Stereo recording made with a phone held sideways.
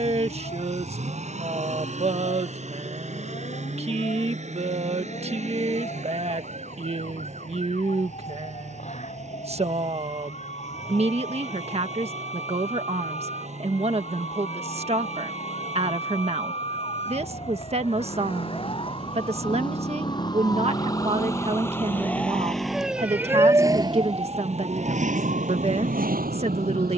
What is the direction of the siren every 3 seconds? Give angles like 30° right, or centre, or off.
60° left, 50° left, 50° left, 50° left, 50° left, 40° left, 30° left, centre, 60° right.